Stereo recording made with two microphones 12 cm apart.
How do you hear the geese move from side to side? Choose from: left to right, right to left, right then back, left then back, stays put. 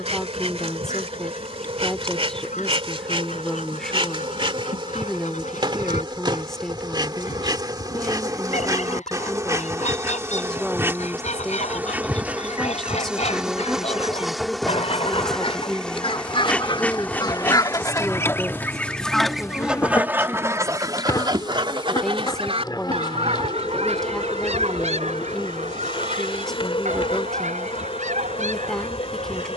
left to right.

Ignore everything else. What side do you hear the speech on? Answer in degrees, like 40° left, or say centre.
centre.